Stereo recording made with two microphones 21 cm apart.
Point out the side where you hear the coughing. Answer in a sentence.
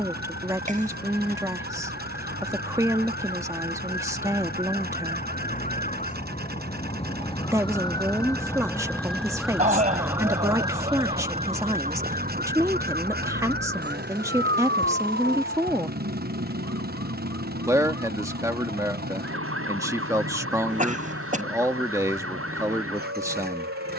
You can hear the coughing on the right.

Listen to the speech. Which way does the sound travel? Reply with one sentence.
You can hear the speech stay put.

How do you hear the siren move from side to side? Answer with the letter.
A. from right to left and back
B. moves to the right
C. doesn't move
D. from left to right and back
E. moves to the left
B.